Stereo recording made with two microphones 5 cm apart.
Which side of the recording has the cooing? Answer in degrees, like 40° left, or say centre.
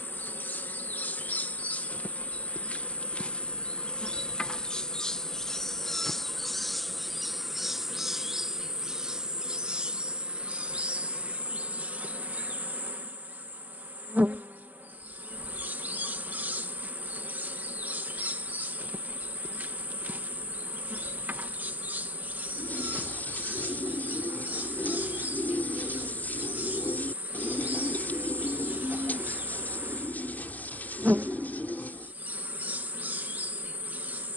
40° left.